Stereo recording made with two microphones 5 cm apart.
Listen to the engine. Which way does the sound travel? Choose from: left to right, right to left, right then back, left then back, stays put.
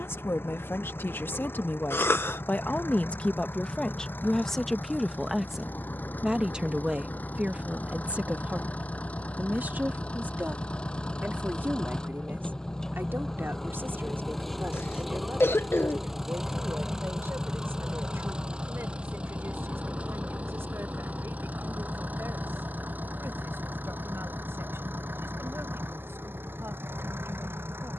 left to right.